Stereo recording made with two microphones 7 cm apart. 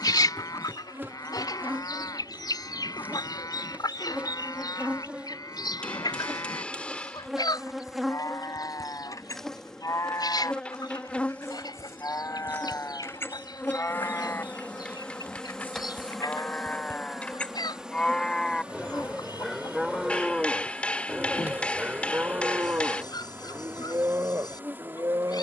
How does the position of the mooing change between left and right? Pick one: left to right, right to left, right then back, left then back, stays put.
left to right.